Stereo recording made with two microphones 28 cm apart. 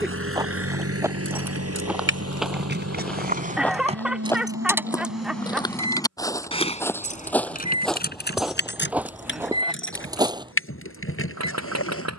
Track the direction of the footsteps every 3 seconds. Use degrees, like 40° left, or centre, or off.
10° right, 10° left, centre, 10° right.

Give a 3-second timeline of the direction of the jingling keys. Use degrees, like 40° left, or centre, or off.
50° right, 10° right, 30° left, 50° left.